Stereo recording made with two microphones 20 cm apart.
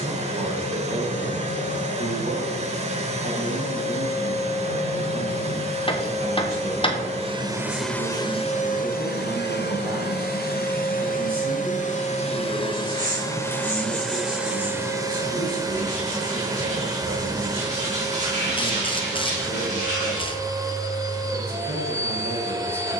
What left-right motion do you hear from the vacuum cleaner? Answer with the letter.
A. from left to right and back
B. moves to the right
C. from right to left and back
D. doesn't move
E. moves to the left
C.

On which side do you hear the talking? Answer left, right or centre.
right.